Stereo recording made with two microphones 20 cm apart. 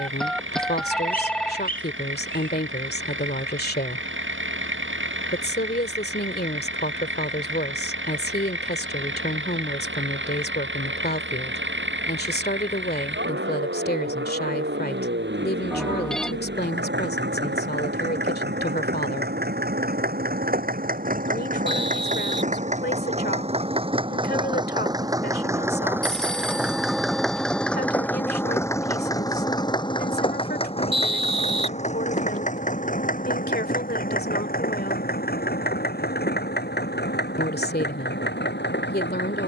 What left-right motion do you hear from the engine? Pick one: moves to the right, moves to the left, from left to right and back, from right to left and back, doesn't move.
moves to the left.